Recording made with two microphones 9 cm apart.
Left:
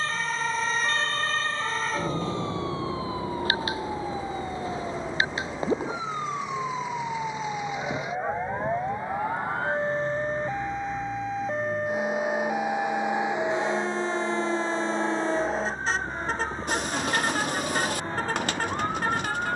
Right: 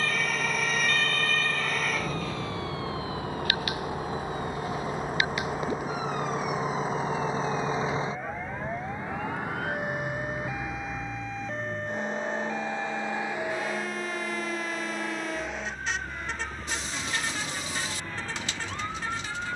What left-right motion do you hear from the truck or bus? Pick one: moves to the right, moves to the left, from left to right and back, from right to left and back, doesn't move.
moves to the left.